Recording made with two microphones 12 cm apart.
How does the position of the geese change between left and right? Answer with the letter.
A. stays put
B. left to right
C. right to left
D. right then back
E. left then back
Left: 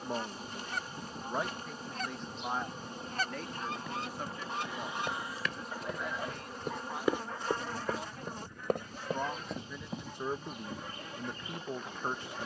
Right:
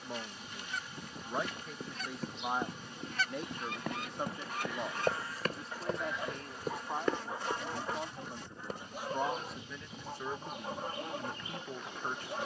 B.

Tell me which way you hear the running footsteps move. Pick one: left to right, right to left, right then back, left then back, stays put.
right to left.